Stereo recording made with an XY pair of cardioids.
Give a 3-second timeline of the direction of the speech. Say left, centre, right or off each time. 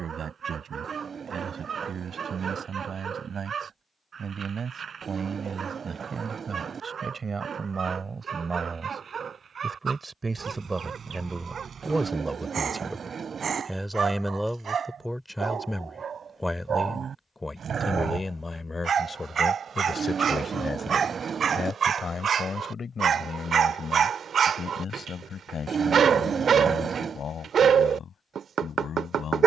right, right, right, right, centre, centre, left, left, left, left.